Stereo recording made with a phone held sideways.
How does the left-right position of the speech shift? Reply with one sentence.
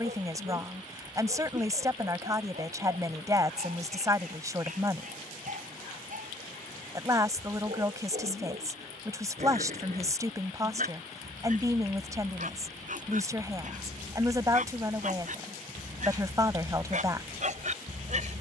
In this clip you hear the speech stay put.